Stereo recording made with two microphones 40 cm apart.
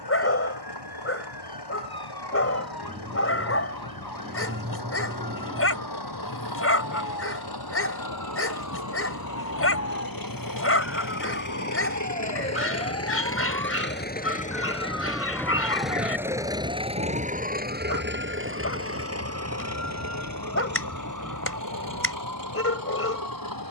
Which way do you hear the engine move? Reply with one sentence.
You can hear the engine move from left to right.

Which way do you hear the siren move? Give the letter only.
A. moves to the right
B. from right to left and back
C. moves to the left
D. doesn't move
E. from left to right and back
A.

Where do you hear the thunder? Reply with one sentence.
You can hear the thunder on the right.